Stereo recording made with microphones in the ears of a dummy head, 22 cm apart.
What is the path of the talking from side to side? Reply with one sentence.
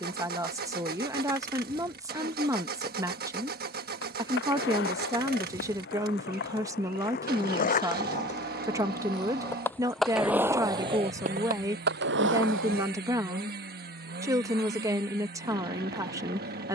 You can hear the talking stay in one place.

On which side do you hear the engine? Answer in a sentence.
In this clip you hear the engine on the right.